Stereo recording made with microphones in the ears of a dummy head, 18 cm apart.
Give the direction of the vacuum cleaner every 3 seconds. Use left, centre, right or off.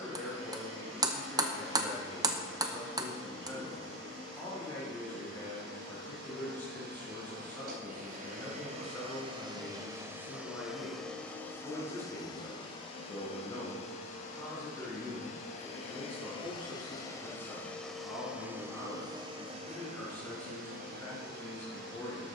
right, right, right, centre, left, left, right, right.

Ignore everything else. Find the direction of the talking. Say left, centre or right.
centre.